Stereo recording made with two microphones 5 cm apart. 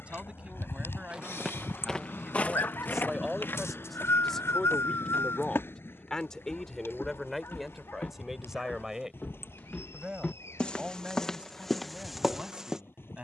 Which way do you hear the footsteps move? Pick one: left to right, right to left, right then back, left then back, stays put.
left then back.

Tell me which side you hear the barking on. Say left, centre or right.
left.